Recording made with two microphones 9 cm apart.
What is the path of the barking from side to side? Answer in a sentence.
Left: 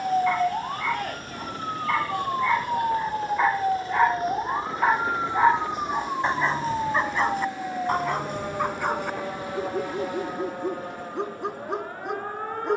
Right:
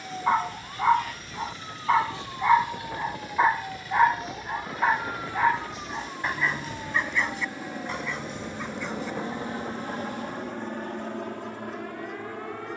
In this clip you hear the barking move to the left.